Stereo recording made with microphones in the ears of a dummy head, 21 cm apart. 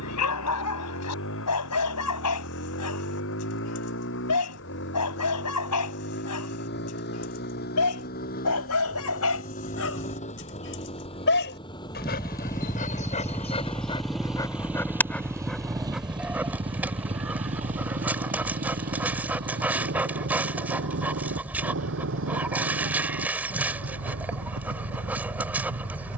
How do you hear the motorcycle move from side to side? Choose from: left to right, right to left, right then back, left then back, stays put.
left to right.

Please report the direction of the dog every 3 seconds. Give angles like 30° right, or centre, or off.
80° left, 80° left, 70° left, 60° left, 30° left, centre, 10° right, 10° right, 10° right.